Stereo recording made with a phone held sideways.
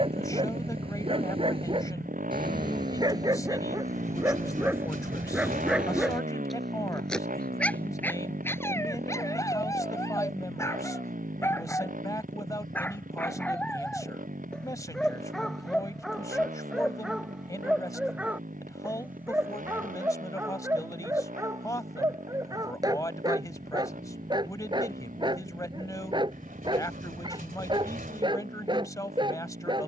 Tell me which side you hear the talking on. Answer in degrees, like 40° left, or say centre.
20° left.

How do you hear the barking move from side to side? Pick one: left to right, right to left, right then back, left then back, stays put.
left then back.